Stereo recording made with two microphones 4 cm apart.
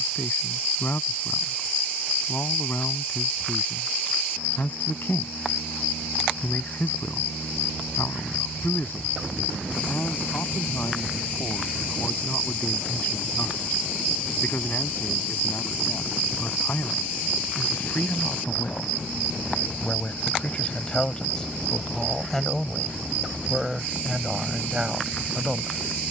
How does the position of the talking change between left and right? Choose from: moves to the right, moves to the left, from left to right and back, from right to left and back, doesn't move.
moves to the right.